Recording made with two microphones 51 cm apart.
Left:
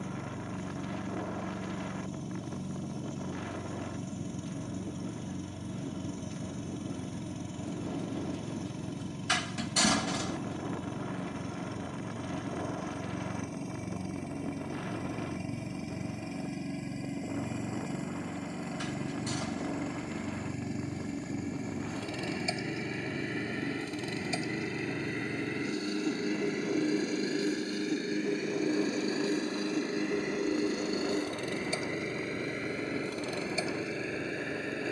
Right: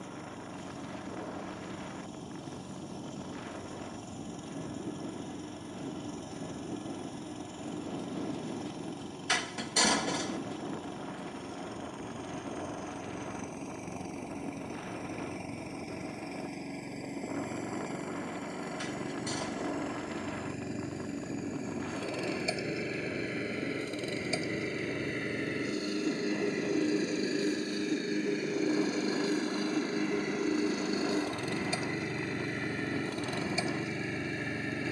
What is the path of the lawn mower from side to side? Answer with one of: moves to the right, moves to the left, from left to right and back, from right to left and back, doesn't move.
moves to the right.